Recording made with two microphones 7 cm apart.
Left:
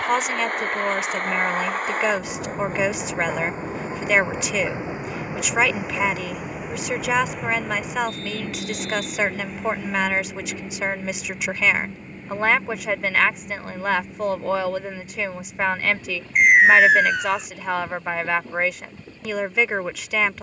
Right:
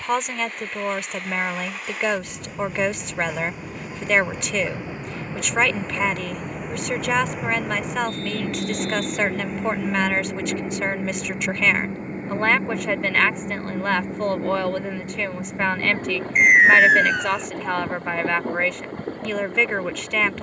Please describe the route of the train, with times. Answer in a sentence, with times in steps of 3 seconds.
You can hear the train on the left from 0 s, in the centre from 6 s and on the right from 9 s.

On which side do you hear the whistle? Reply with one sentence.
In this clip you hear the whistle in the centre.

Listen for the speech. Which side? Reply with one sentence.
You can hear the speech in the centre.